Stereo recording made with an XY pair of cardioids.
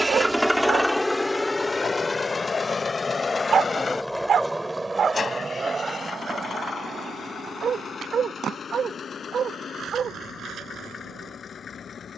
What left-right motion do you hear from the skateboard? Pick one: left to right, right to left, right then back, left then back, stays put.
left to right.